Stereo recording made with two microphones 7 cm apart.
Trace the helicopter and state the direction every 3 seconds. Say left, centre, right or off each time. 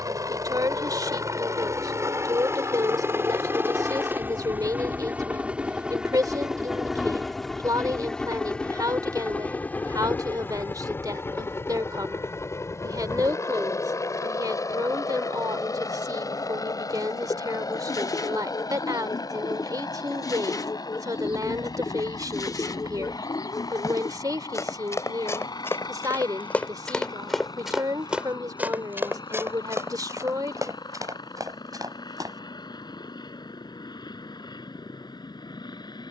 right, right, centre, left, left, left, left, left, left, left, left, left.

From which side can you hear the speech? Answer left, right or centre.
right.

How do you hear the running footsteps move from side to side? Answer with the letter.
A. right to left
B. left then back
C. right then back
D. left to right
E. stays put
D.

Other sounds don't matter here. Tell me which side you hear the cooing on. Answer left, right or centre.
left.